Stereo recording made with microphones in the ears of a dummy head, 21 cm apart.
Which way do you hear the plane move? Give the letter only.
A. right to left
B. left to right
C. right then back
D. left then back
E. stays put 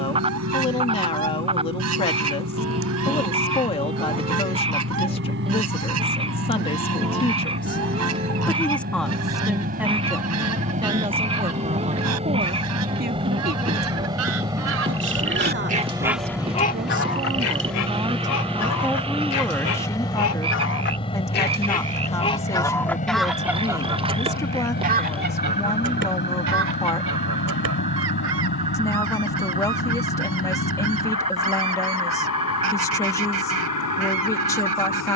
A.